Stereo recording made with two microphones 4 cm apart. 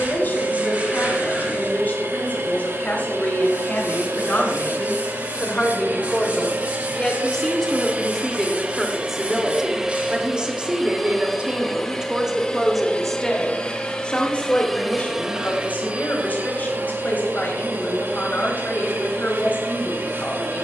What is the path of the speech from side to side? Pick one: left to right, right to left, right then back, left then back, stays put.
right then back.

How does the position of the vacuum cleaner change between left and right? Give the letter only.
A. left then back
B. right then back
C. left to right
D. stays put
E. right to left
A.